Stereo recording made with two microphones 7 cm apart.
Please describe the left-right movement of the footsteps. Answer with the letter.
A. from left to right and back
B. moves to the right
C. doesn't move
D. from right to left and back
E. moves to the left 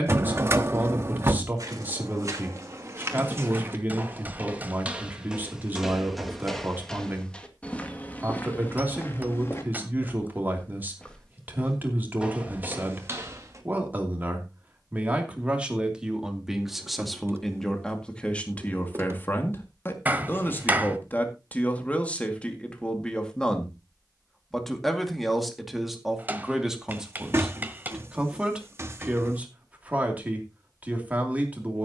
D.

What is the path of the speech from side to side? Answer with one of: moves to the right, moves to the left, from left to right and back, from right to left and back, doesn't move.
from right to left and back.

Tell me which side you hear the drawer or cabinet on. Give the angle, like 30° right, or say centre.
30° right.